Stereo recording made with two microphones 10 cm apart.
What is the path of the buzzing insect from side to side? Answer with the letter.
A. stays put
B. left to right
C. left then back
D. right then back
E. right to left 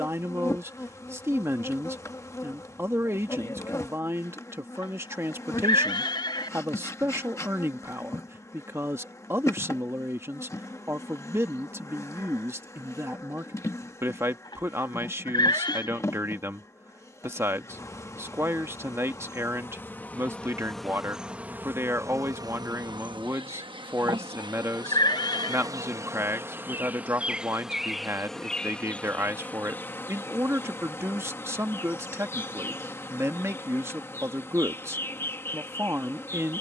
D.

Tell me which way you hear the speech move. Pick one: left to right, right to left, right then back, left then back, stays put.
stays put.